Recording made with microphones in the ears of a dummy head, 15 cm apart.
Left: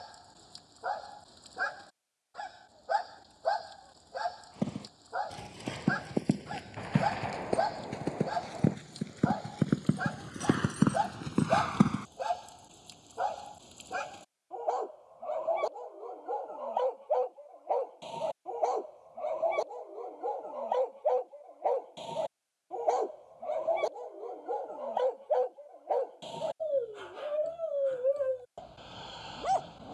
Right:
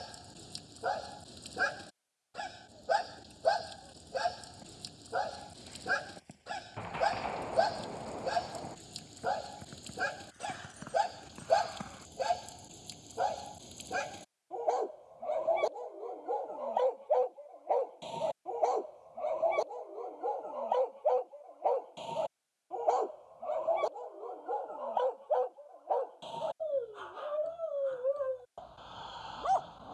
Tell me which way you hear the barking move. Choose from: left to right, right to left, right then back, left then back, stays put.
right to left.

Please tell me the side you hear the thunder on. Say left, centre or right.
centre.